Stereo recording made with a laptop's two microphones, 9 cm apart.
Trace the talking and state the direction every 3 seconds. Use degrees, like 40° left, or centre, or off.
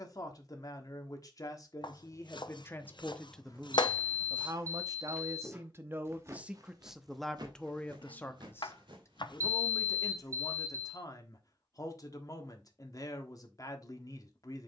40° left, 20° right, centre, 40° left, 40° left.